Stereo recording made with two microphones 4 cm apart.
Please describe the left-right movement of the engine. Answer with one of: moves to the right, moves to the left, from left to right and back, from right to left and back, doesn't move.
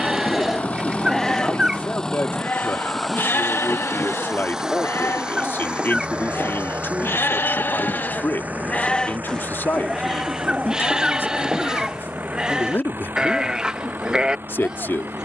moves to the right.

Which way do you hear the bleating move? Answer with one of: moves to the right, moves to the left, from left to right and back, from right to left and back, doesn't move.
from right to left and back.